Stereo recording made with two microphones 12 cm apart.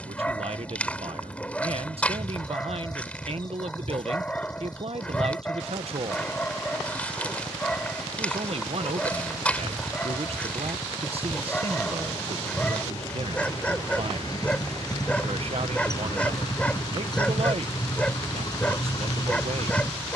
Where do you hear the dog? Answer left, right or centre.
centre.